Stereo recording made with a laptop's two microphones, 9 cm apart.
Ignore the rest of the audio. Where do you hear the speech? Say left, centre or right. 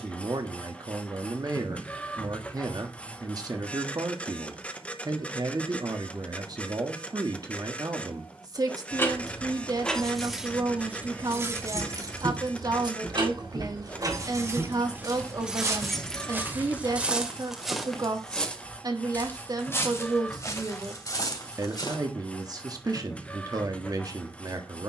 right.